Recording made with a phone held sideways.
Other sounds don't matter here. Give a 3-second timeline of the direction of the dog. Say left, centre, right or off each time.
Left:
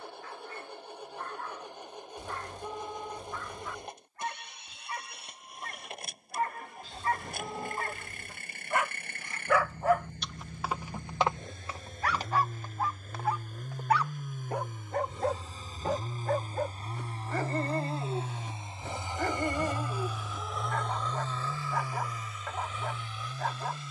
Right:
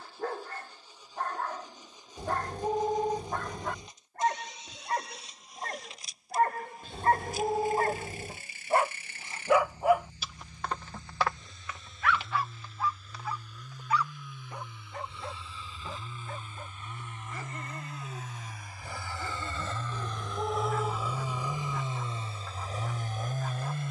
right, right, right, centre, left, left, left, left.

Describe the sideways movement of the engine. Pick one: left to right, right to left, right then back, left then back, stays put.
left to right.